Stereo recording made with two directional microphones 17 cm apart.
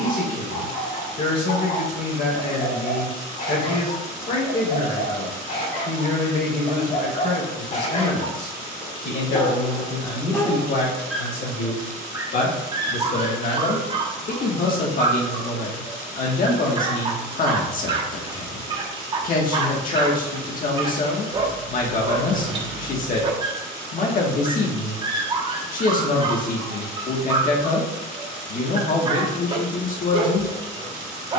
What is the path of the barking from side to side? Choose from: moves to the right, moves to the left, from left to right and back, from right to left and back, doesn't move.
moves to the right.